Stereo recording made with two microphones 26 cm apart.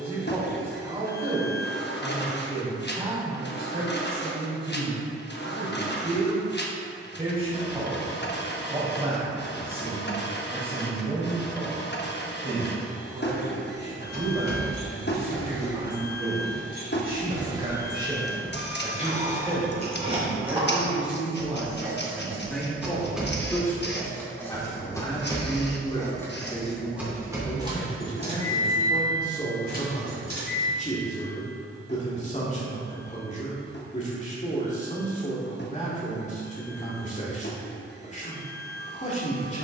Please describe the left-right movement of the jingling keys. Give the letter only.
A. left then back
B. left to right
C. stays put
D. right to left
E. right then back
A.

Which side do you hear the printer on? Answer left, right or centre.
left.